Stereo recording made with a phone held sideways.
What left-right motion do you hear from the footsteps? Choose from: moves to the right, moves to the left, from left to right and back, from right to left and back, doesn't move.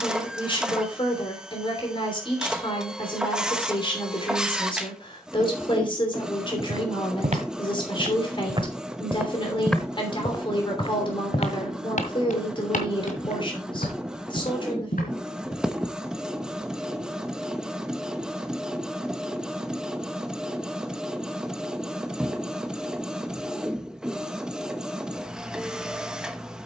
moves to the left.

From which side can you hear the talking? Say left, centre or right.
left.